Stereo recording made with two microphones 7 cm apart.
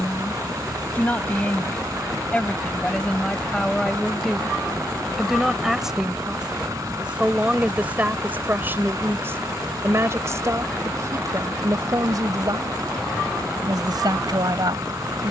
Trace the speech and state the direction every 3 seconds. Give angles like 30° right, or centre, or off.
20° left, centre, 20° right, 40° right, 60° right.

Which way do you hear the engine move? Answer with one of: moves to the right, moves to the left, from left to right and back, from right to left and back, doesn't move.
doesn't move.